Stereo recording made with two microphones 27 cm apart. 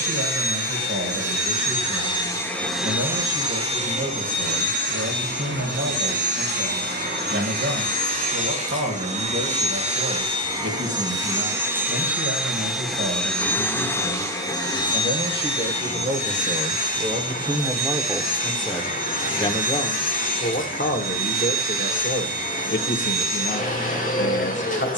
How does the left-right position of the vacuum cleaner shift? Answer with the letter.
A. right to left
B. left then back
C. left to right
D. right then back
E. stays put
D.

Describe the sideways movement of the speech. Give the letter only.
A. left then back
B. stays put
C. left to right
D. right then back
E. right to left
E.